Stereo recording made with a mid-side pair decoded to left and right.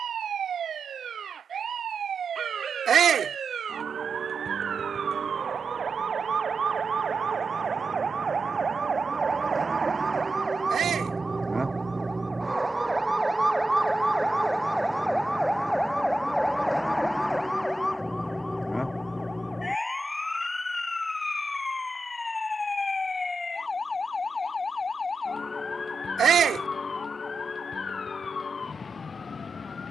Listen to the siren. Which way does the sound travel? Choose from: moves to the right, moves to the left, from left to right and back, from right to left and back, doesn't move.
moves to the left.